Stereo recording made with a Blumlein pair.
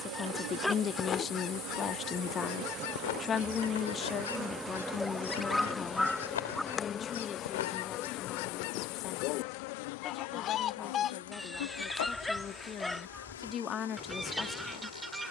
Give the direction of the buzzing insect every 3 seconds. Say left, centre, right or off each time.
right, centre, left, left, left.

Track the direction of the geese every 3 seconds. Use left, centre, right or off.
left, left, left, left, centre.